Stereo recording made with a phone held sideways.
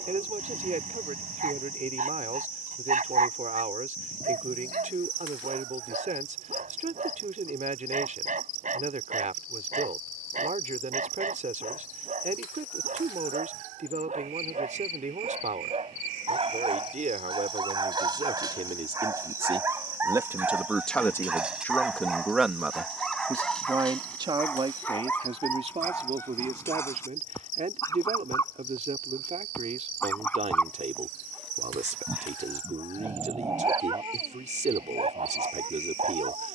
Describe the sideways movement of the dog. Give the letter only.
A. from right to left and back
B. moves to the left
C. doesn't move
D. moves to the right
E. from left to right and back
A.